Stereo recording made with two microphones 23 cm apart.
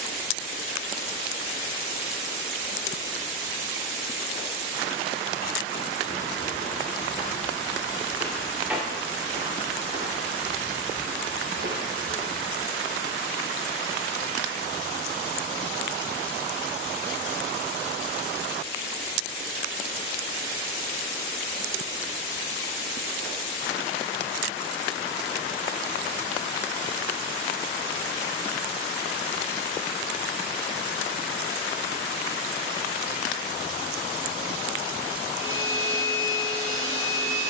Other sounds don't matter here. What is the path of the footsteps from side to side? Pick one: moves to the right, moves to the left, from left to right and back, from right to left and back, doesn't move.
moves to the right.